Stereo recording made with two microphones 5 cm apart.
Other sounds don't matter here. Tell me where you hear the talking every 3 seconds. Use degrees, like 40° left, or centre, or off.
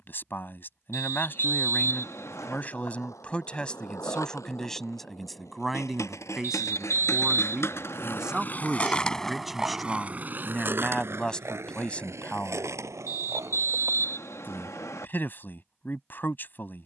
40° left, 10° left, 10° right, 10° left, 30° left, 40° left.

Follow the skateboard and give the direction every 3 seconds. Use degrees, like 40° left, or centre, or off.
80° left, 80° left, 60° left, 30° right, 70° right, off.